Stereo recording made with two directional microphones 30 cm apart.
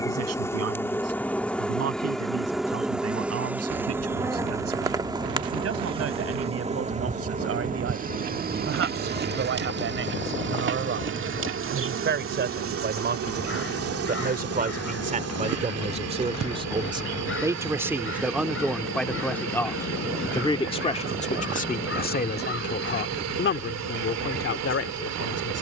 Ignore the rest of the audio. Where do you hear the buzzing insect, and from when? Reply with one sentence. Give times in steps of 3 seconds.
In this clip you hear the buzzing insect in the centre from 0 s and on the right from 6 s.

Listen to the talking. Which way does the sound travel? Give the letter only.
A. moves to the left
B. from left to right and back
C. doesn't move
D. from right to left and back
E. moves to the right
A.